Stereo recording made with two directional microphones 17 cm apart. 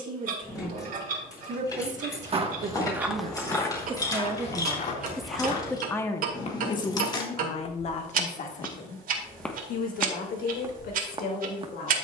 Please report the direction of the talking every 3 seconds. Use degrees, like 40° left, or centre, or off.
50° right, 10° right, 40° left, 60° left.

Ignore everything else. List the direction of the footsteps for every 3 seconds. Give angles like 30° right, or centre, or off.
30° right, 30° left, 30° left, 10° right.